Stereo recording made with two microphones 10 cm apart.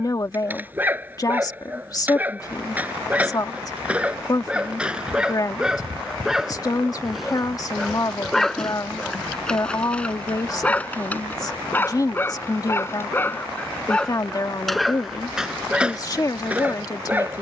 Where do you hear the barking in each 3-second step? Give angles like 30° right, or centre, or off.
20° right, 10° right, centre, 10° left, 10° left, 10° right.